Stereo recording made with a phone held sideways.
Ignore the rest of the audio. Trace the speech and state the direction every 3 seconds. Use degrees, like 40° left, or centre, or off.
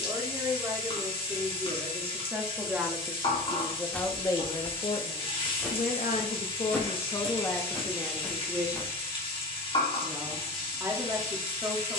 20° right, 20° left, 20° left, 20° right.